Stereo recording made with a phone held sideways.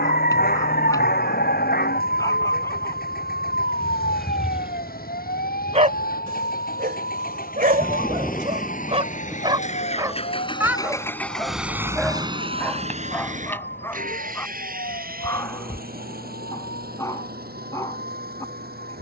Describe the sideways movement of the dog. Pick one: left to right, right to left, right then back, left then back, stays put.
right then back.